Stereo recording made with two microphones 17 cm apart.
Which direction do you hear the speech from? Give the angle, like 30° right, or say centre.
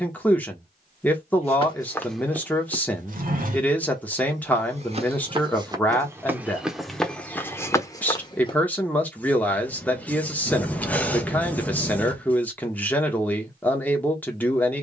10° left.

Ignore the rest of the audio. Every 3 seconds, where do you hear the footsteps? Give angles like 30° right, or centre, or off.
10° left, 40° right, 10° left, off, off.